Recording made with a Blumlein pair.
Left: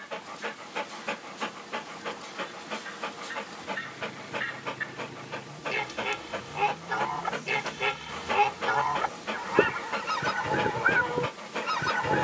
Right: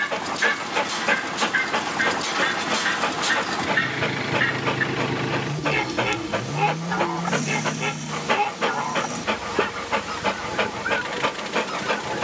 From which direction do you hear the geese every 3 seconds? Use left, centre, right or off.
right, right, centre, centre.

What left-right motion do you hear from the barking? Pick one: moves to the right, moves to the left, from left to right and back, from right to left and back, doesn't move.
doesn't move.